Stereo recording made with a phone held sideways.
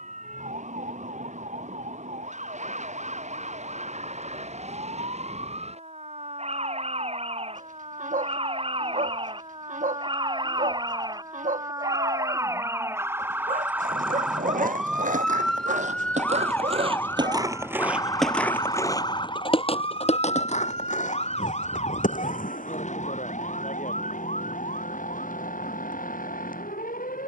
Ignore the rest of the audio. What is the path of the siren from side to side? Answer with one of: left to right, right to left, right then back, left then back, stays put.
right to left.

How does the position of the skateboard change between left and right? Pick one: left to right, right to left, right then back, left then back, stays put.
right to left.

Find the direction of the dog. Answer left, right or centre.
right.